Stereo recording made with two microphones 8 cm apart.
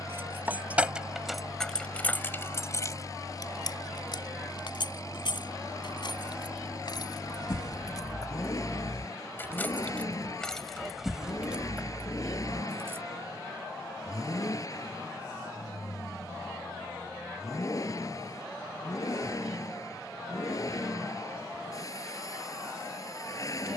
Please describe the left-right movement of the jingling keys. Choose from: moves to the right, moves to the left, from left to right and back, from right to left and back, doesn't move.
from right to left and back.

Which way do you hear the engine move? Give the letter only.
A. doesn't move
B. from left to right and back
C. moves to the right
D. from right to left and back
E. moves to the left
A.